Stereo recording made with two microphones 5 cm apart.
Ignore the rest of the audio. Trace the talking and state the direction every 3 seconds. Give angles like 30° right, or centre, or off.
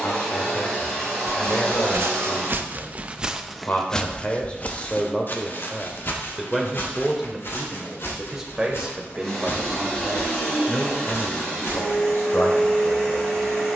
50° left, 30° left, centre, 10° left, 60° left.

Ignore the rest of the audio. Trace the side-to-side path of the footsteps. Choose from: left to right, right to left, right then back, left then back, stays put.
right to left.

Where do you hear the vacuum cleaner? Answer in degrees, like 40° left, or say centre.
10° left.